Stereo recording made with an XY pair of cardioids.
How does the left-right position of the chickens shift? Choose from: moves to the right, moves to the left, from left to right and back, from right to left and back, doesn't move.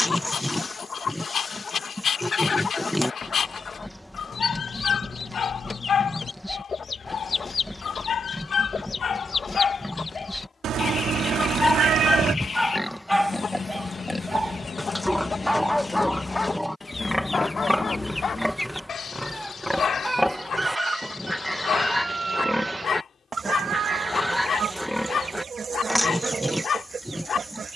moves to the right.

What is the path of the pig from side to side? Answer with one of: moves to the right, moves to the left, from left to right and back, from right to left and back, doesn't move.
doesn't move.